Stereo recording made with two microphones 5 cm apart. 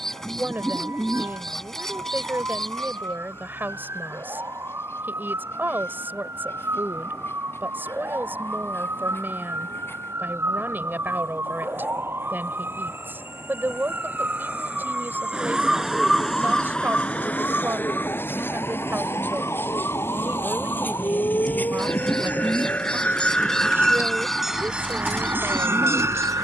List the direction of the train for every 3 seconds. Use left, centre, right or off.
left, left, left, left, left, left, left, left, right.